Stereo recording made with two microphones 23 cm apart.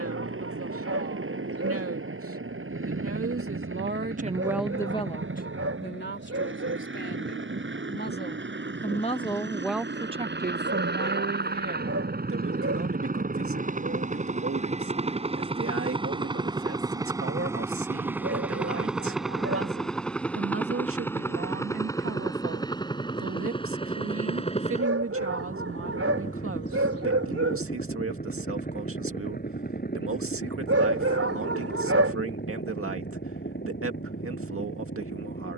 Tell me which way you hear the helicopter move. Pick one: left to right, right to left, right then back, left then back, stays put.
right to left.